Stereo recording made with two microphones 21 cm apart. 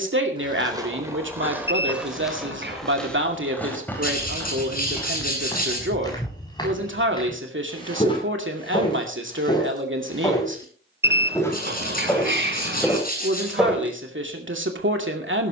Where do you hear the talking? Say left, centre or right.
right.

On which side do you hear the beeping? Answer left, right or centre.
right.